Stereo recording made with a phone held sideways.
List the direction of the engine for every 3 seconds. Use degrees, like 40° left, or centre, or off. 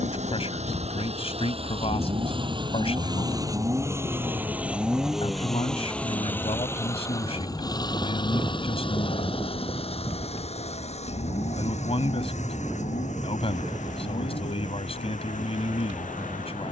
40° right, 10° right, 20° left, 50° left, 60° left, 60° left.